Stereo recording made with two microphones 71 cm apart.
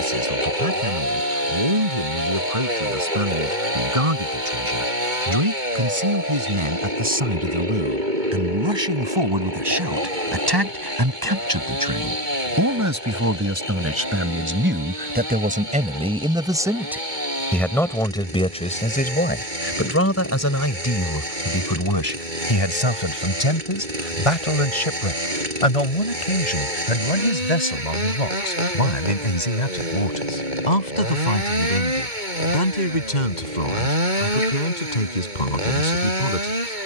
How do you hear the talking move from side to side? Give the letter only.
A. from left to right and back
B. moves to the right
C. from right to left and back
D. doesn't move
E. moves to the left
E.